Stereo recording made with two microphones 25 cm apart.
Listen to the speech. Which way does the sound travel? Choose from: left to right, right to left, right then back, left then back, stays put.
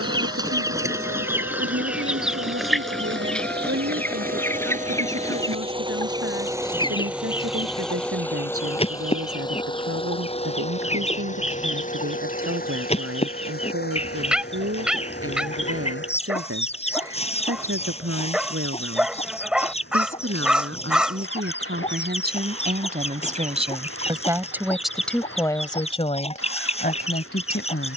right to left.